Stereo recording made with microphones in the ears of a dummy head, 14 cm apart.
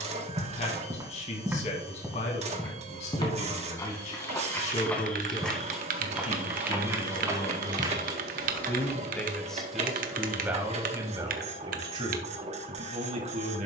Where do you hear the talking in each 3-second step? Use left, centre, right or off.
left, left, left, centre, right.